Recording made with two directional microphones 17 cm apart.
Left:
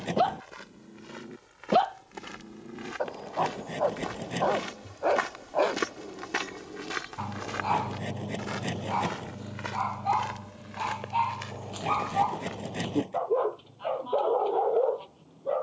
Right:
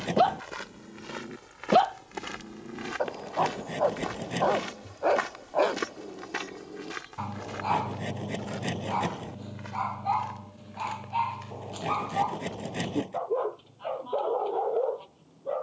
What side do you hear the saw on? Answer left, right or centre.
centre.